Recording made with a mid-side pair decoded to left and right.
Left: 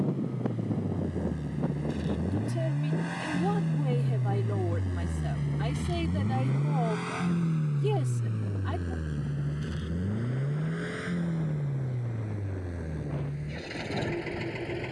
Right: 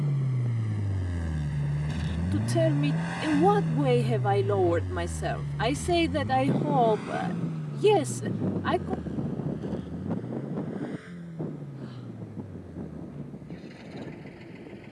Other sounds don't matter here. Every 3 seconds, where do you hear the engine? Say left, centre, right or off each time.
right, centre, left, left, left.